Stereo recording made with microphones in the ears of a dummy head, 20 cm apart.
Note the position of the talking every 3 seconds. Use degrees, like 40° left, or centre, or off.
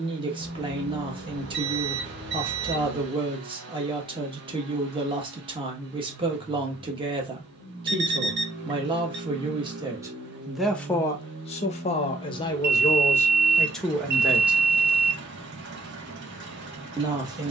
20° right, 20° right, 20° right, centre, 10° left, 20° right.